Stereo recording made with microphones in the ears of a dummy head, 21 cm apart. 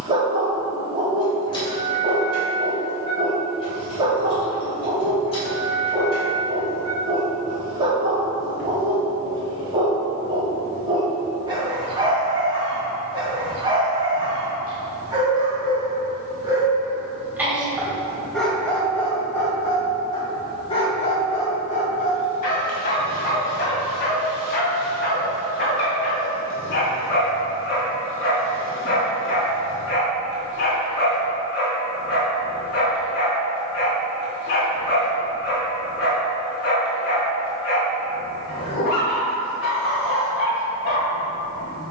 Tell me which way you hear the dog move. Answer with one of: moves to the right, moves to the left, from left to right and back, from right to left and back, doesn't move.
moves to the left.